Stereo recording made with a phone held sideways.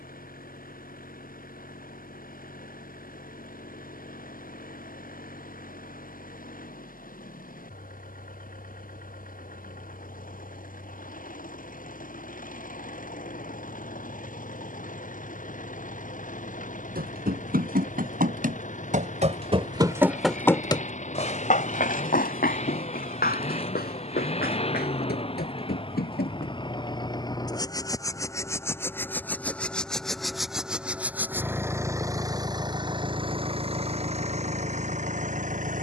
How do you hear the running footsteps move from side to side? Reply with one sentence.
In this clip you hear the running footsteps move from right to left.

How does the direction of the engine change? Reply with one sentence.
You can hear the engine move to the right.